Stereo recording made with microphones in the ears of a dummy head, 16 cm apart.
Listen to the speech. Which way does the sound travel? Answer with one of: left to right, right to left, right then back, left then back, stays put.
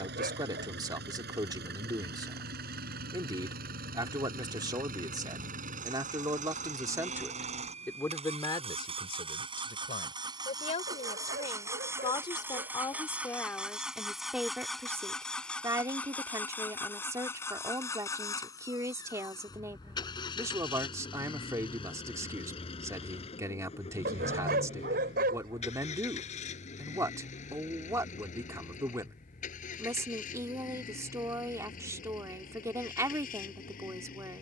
left then back.